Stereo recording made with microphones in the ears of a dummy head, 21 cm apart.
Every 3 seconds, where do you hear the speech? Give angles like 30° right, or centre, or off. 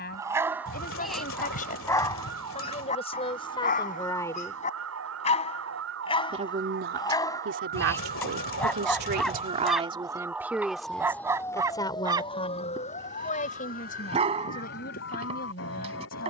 30° left, 20° left, 50° right, 10° right, 30° left, 40° left.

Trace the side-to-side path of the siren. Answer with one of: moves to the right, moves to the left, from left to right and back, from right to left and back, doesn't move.
moves to the left.